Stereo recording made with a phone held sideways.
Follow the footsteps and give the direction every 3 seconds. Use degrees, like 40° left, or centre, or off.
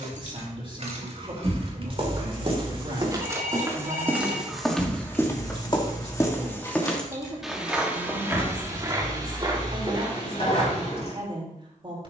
50° right, centre, centre, 40° right.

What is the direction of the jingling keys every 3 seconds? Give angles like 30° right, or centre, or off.
50° right, centre, 30° left, 40° left.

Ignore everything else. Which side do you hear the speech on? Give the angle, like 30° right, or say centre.
40° right.